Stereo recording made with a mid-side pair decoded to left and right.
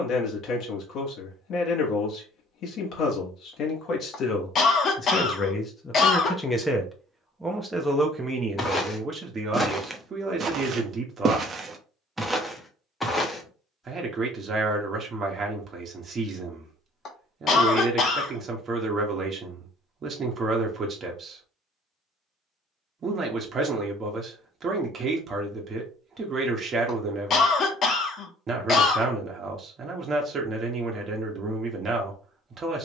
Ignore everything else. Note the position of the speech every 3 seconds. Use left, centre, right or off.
left, left, centre, right, right, right, right, right, right, right, right.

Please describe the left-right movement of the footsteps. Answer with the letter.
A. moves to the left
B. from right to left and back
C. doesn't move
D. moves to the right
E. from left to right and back
E.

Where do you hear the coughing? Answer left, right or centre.
left.